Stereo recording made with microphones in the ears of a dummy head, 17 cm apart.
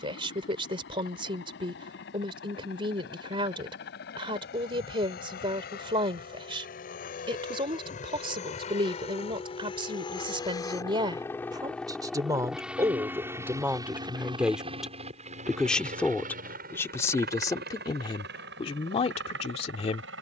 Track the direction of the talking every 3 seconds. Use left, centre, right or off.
right, right, right, right, centre, centre, left.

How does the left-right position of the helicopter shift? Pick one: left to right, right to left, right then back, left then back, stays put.
left to right.